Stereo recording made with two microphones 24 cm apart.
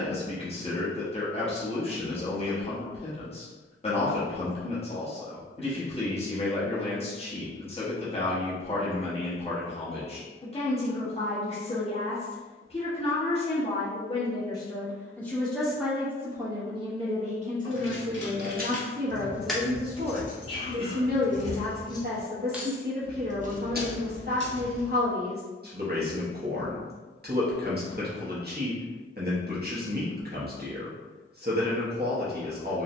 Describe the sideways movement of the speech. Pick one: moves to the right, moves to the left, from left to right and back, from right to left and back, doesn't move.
moves to the right.